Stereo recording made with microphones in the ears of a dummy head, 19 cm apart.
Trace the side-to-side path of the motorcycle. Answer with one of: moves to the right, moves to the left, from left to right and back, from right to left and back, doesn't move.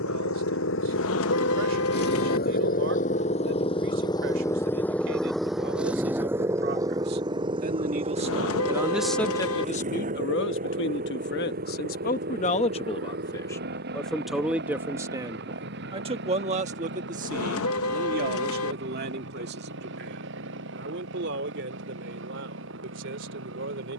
moves to the right.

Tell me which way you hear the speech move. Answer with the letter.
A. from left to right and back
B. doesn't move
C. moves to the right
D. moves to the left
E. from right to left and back
E.